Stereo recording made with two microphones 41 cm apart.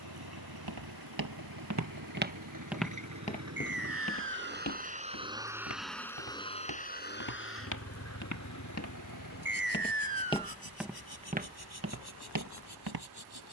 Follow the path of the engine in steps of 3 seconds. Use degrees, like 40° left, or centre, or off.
60° right, 20° right, 30° left, 60° left, 70° left.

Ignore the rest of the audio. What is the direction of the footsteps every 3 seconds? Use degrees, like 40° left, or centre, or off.
40° right, 40° left, 50° left, centre, 50° right.